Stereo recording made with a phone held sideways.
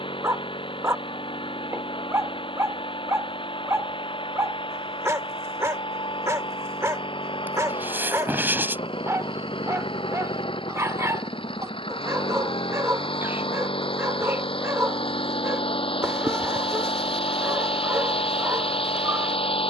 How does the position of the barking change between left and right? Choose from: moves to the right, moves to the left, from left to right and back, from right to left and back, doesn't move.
doesn't move.